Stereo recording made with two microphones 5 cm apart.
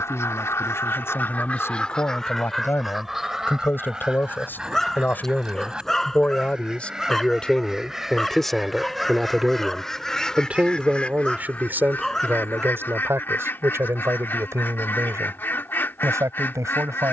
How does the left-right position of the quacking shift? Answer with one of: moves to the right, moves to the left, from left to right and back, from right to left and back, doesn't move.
from left to right and back.